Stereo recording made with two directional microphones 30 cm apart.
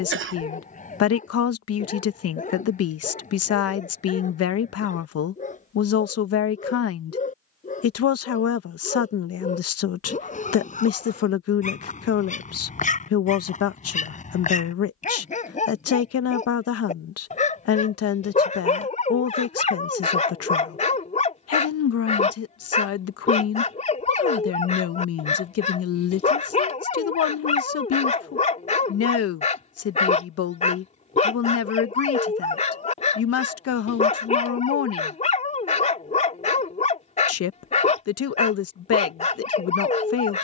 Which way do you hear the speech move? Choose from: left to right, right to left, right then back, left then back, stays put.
stays put.